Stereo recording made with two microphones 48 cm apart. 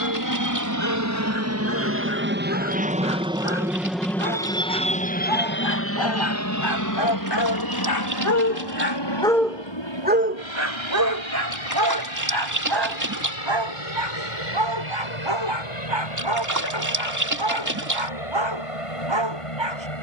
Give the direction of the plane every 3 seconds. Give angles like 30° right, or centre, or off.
30° right, 10° left, 40° left, 60° left, 70° left, 70° left, 80° left.